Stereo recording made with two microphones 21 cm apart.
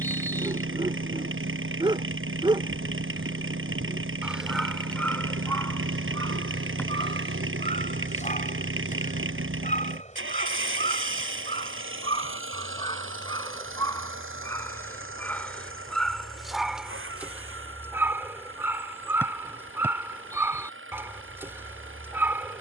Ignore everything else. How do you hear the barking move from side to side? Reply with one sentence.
In this clip you hear the barking move from right to left and back again.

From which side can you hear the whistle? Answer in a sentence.
In this clip you hear the whistle in the centre.